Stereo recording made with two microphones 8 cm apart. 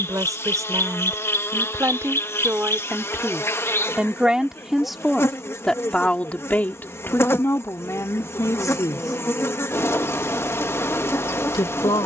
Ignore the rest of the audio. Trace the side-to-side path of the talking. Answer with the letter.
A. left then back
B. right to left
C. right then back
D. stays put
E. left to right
B.